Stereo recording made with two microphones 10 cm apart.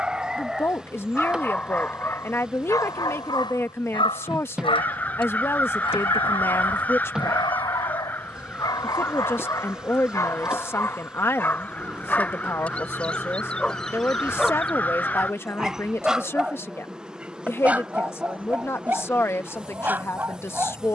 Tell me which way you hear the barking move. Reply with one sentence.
In this clip you hear the barking move from right to left and back again.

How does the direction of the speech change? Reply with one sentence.
In this clip you hear the speech stay put.